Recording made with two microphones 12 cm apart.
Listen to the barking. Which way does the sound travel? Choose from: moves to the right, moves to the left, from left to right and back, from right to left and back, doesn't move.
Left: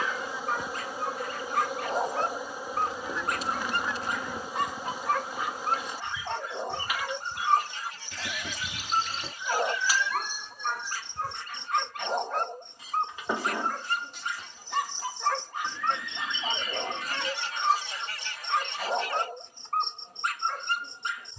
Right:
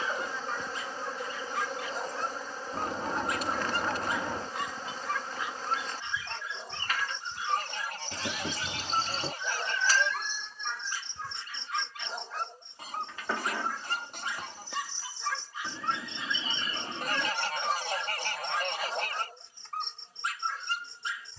doesn't move.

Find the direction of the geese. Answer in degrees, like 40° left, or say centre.
60° right.